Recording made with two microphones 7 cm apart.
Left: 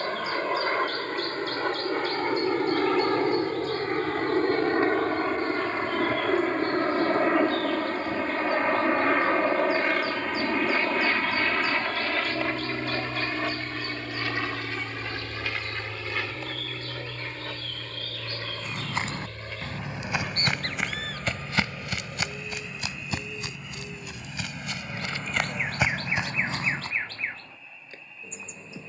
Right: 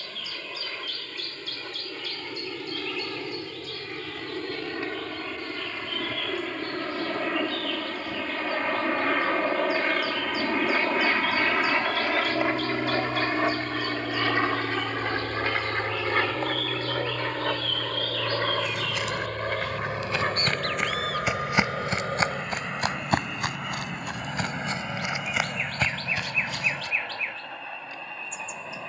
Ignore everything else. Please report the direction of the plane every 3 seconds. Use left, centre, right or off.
left, left, left, centre, right, right, right, right, right, right.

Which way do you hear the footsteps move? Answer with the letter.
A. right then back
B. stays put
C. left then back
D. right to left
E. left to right
A.